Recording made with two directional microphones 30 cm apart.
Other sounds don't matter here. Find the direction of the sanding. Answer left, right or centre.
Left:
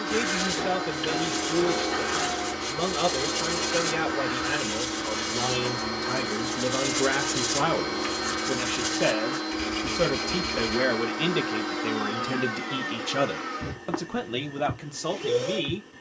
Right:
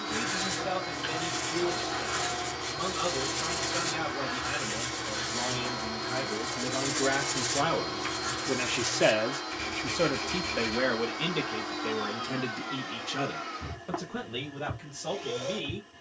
left.